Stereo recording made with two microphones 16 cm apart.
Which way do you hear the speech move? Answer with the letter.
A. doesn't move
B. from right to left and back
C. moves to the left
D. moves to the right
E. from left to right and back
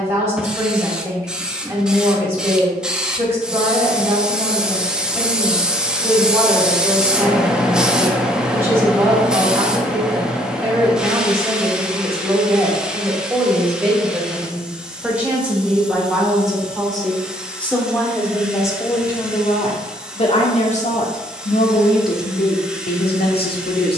C.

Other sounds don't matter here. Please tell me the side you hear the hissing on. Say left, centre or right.
centre.